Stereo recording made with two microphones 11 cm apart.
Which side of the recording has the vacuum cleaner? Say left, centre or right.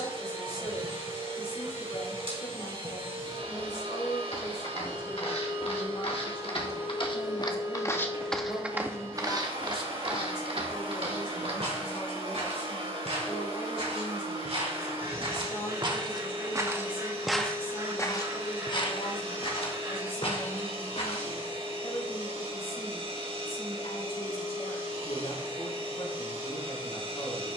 right.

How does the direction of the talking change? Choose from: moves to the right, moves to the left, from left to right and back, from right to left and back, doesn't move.
doesn't move.